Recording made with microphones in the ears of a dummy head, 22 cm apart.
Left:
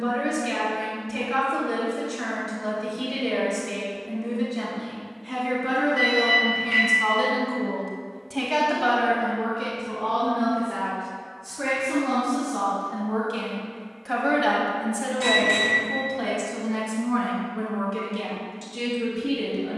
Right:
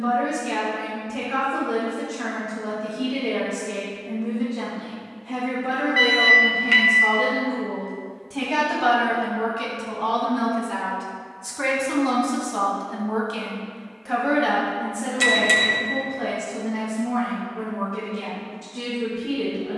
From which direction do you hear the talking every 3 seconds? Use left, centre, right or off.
left, left, left, right, centre, left, left.